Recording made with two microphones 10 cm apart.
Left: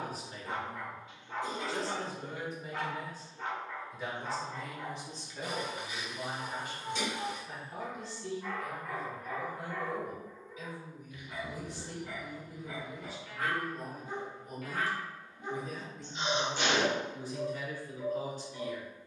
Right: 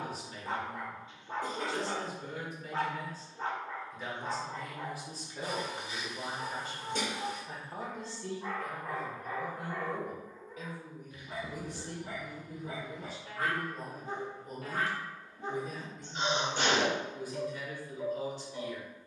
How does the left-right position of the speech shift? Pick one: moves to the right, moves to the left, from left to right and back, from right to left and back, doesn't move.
from left to right and back.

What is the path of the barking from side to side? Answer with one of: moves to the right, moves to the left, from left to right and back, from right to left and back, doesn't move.
doesn't move.